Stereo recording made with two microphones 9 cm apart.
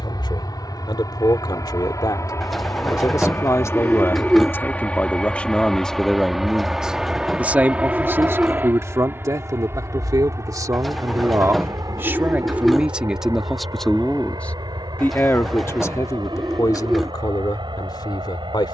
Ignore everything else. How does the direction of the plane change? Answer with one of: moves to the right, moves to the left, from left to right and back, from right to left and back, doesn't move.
moves to the right.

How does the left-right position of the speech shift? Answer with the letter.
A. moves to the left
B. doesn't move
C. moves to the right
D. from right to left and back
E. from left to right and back
E.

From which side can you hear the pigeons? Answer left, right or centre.
centre.